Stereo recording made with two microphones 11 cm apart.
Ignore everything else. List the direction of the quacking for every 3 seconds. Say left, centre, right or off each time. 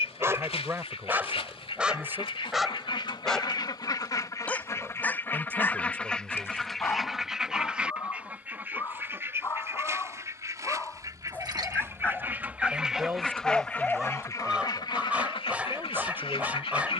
left, left, centre, right, centre, left.